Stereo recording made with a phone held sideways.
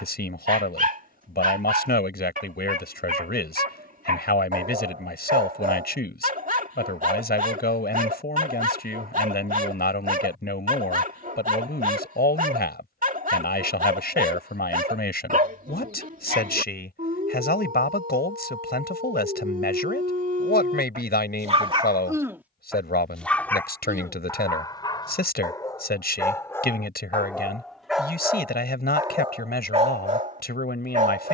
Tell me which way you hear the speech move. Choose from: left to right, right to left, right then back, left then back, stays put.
stays put.